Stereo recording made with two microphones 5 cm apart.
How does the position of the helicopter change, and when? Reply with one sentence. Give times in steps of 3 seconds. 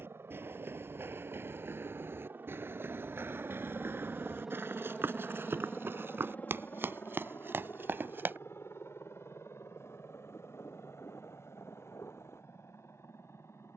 In this clip you hear the helicopter on the right from 0 s, in the centre from 3 s and on the left from 6 s.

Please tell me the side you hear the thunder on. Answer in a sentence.
In this clip you hear the thunder on the left.